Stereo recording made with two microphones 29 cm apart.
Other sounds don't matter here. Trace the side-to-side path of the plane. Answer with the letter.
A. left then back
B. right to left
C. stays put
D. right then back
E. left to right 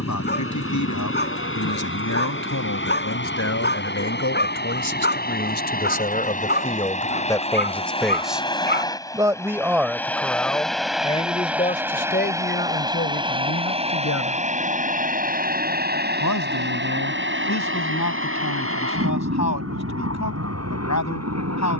E.